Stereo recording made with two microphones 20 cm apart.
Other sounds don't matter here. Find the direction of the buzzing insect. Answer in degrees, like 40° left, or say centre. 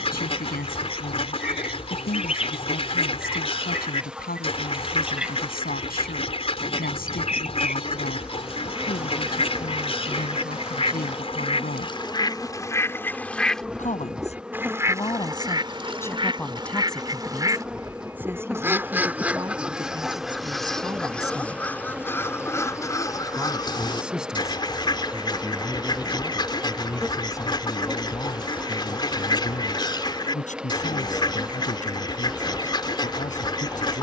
centre.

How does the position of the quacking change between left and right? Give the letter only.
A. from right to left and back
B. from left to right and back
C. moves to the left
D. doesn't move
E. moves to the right
B.